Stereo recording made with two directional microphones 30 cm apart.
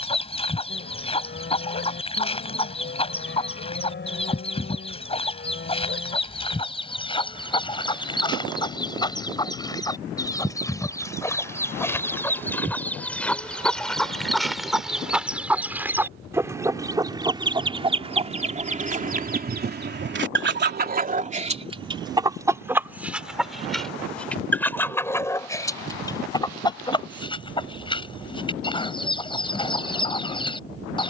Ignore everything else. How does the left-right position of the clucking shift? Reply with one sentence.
In this clip you hear the clucking go right and come back.